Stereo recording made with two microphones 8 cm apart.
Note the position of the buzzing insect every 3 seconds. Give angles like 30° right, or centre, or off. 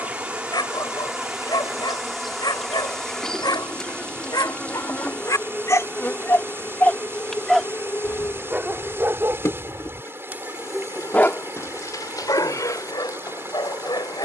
10° right, 10° left, 30° left, 40° left, 50° left.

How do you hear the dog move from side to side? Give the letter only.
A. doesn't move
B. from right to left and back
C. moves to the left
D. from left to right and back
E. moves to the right
D.